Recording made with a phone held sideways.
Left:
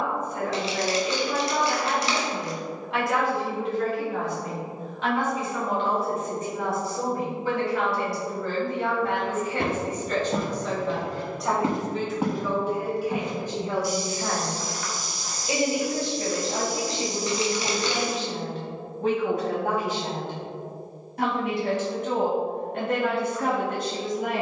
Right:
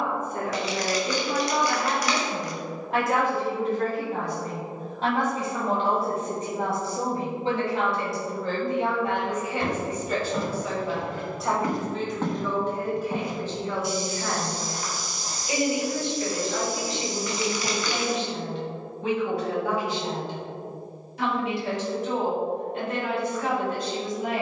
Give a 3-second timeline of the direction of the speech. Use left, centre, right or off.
right, right, right, centre, centre, left, left, left.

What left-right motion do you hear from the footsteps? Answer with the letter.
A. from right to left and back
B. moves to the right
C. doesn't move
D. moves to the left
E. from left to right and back
B.